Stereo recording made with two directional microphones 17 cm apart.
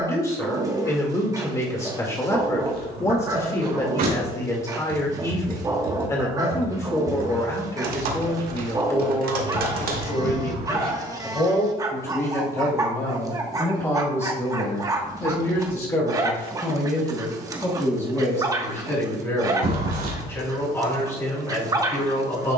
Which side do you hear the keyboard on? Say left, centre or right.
right.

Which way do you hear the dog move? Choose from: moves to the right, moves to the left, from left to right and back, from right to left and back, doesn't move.
doesn't move.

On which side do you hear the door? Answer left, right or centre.
right.